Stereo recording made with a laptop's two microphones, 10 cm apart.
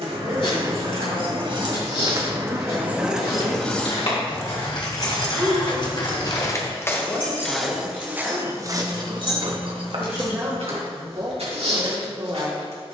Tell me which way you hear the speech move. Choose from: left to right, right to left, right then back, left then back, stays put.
left then back.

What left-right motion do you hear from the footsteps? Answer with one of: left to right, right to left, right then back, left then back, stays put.
left to right.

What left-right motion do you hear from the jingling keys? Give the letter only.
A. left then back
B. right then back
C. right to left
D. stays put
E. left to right
C.